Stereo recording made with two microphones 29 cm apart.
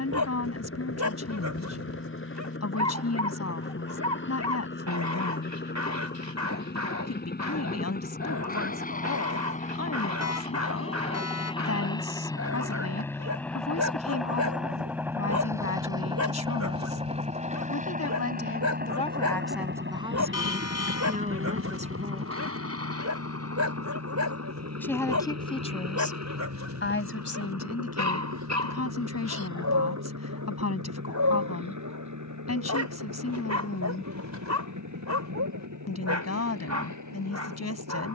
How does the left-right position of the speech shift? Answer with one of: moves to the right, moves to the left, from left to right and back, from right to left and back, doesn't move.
from left to right and back.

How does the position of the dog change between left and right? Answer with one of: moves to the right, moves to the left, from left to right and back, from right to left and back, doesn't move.
doesn't move.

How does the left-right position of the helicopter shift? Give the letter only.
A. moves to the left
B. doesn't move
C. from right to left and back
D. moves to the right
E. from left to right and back
D.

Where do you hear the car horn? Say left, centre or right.
left.